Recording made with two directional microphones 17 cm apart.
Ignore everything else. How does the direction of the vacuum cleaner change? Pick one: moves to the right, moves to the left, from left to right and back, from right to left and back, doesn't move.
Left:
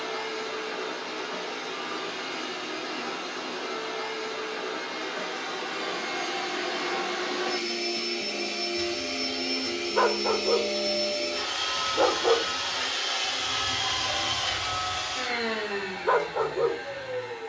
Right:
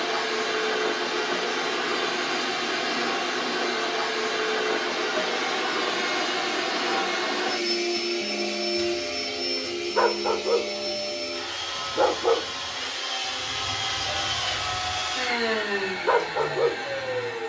from right to left and back.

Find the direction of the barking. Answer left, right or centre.
centre.